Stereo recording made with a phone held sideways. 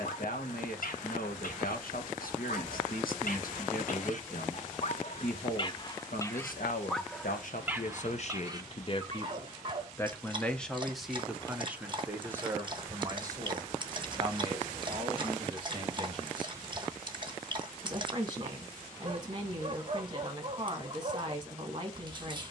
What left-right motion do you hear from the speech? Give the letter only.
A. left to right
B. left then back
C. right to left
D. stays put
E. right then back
A.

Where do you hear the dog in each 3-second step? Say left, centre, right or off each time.
left, left, centre, right, right, right, right, right.